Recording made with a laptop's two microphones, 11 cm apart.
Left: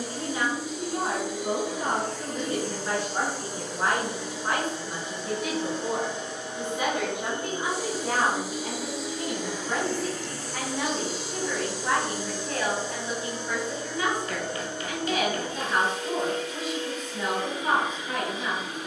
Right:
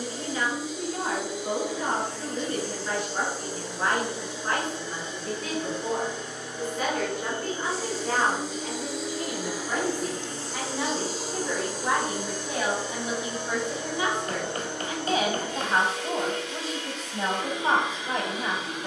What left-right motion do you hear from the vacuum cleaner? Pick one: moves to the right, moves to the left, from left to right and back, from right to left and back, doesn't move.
moves to the right.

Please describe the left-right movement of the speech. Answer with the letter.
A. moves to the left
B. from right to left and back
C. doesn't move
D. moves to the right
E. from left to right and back
D.